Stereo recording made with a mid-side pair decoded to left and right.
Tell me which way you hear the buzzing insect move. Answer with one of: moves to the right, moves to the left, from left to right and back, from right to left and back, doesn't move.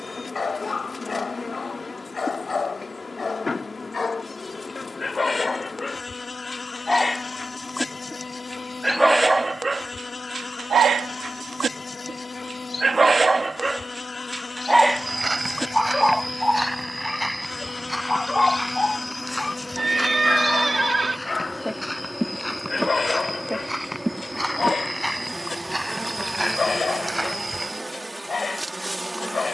moves to the right.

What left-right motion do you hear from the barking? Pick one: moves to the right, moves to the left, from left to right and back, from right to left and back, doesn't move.
from left to right and back.